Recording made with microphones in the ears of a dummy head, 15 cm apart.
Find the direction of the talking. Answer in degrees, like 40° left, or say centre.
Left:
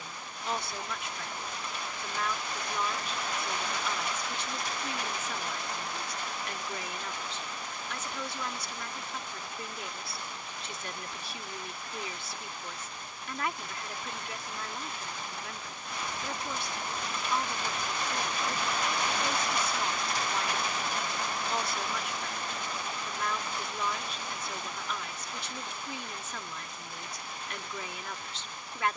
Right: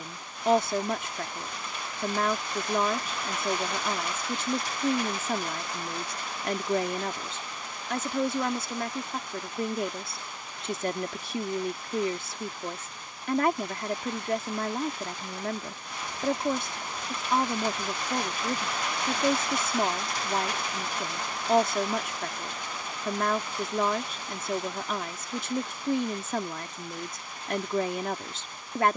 40° right.